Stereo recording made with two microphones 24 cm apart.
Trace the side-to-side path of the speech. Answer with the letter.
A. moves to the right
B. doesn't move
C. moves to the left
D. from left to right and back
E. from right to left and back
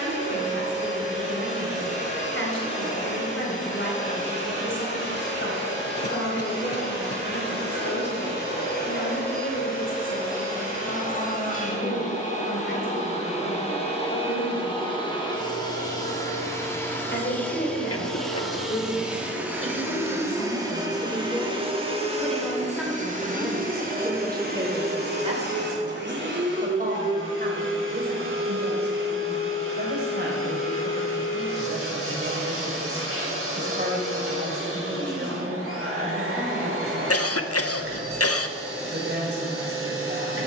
A.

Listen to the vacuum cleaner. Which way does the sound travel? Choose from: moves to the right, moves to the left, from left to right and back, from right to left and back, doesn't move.
moves to the right.